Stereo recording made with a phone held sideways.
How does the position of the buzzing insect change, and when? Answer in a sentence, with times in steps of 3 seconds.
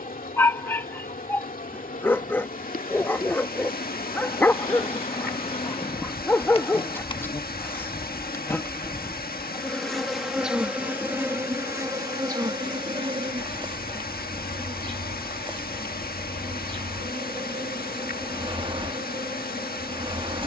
In this clip you hear the buzzing insect on the left from 0 s, in the centre from 9 s and on the right from 12 s.